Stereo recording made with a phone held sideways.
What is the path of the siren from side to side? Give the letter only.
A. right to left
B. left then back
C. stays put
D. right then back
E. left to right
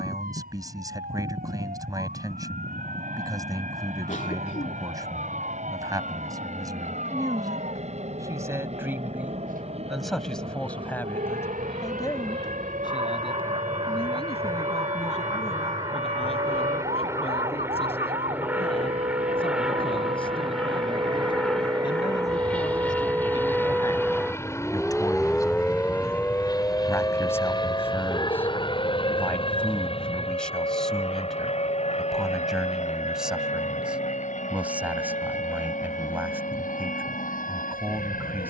A.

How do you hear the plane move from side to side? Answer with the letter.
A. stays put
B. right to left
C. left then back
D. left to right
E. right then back
B.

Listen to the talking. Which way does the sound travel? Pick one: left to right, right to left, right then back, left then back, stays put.
left then back.